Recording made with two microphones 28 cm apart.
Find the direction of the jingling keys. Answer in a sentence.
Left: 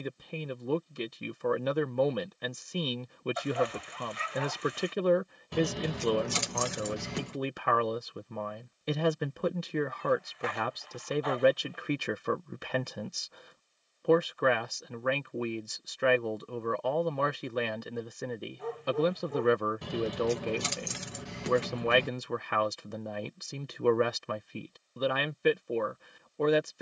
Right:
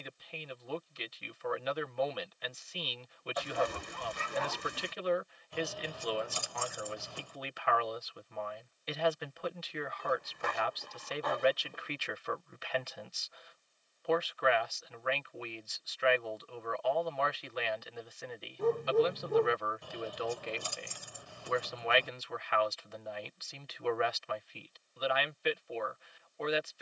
You can hear the jingling keys on the left.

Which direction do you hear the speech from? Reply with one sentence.
In this clip you hear the speech on the left.